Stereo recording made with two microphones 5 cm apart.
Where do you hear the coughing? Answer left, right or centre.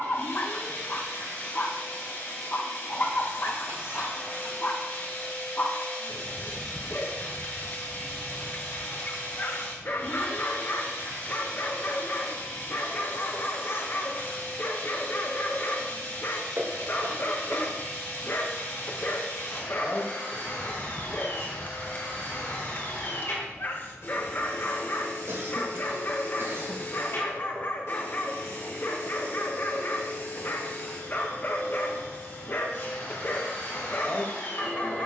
right.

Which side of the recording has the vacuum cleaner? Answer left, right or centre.
left.